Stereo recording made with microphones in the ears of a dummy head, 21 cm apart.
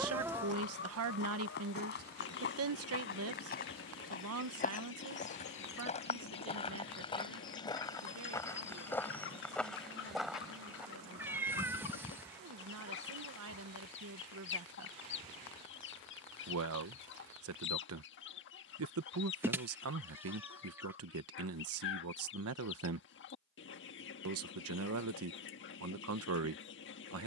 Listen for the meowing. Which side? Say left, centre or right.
centre.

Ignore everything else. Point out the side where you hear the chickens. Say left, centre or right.
left.